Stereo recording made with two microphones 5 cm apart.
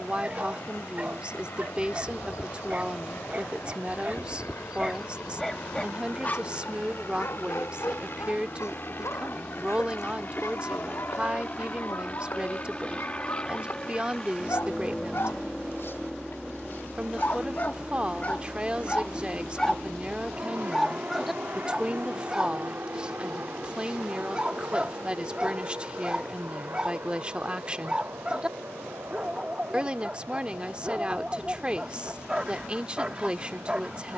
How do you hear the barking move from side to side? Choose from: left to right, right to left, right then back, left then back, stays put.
left then back.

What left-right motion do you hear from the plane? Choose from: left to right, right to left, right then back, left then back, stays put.
left to right.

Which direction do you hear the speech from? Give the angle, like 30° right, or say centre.
20° right.